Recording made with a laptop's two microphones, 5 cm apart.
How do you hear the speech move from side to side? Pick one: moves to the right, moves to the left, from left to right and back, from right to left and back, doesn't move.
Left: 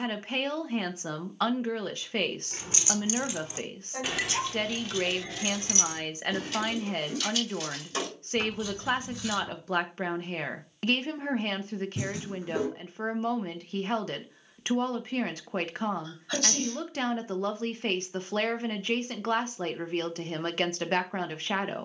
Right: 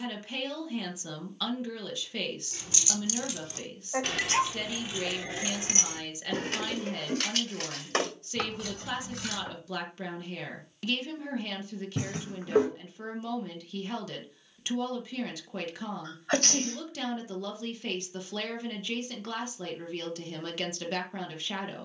doesn't move.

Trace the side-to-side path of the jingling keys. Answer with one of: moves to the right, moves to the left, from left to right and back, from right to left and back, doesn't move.
moves to the right.